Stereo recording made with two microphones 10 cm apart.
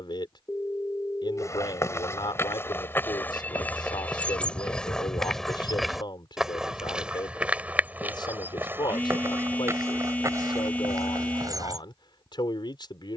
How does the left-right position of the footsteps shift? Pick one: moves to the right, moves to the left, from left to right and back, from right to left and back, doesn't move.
moves to the right.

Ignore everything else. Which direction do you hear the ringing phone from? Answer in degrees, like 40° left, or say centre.
20° left.